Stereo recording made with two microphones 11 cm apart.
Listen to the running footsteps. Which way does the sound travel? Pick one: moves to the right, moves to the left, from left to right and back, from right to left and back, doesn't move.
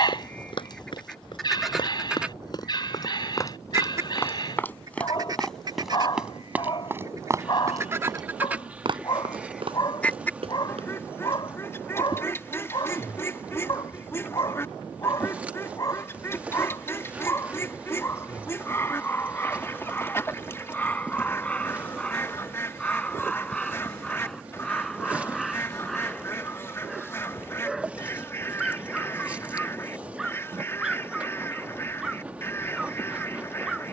moves to the right.